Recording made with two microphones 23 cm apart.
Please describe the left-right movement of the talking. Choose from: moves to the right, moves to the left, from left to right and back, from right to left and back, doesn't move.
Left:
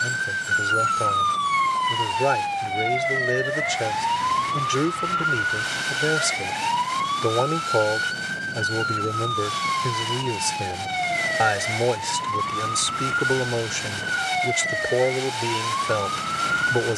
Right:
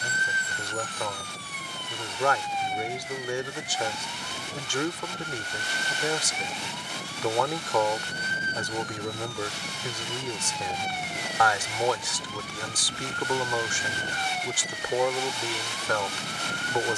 doesn't move.